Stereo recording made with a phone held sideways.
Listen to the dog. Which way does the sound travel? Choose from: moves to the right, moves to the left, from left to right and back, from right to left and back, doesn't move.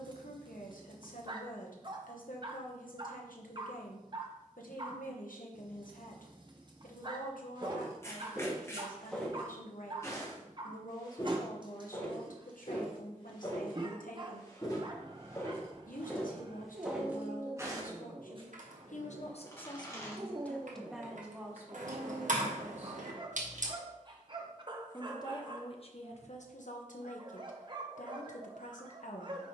doesn't move.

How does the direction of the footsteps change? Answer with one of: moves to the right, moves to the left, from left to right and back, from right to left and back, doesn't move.
from right to left and back.